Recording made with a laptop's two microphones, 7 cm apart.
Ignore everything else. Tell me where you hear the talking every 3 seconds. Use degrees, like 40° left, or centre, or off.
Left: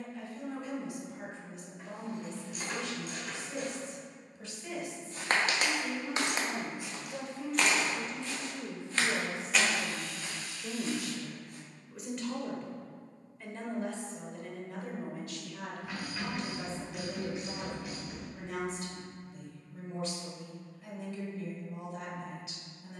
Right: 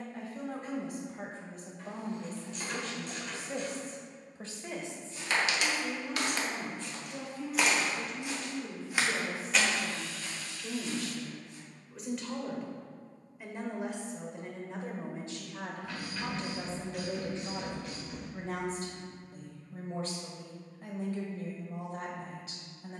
40° right, 30° right, 20° left, 20° left, 10° right, 30° right, 40° right, 40° right.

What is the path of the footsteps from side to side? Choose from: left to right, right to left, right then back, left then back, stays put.
right then back.